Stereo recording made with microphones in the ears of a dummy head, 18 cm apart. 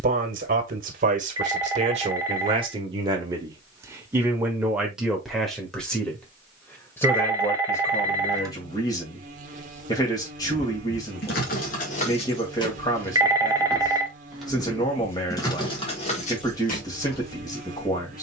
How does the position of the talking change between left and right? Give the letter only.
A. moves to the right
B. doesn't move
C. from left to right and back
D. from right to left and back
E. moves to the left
E.